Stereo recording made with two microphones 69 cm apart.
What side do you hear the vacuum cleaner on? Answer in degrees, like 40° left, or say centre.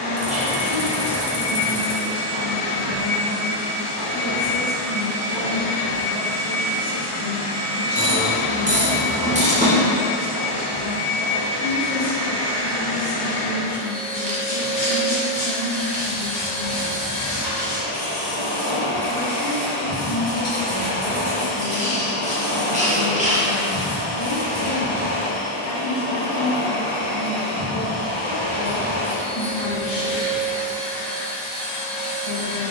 80° left.